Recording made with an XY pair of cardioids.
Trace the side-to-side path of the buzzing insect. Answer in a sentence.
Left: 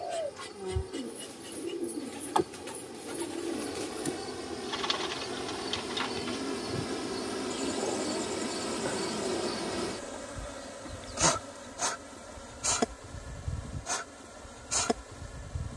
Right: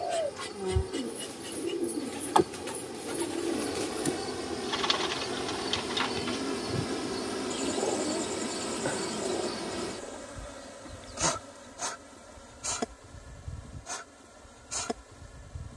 In this clip you hear the buzzing insect go from the right side to the left.